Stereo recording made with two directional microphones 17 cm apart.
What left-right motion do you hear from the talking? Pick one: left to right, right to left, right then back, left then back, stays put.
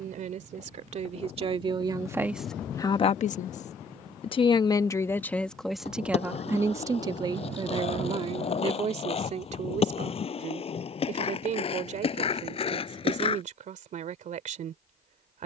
left then back.